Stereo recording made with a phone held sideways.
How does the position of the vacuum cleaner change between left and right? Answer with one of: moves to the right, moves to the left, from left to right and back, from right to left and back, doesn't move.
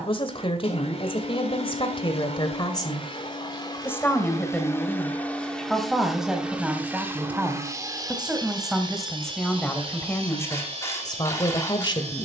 moves to the right.